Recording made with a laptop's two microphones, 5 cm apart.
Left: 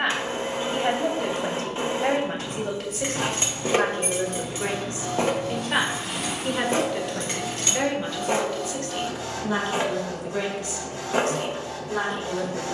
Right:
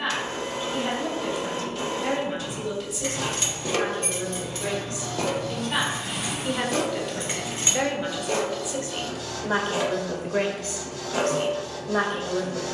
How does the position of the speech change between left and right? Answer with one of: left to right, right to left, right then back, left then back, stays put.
left to right.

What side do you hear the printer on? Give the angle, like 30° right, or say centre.
30° left.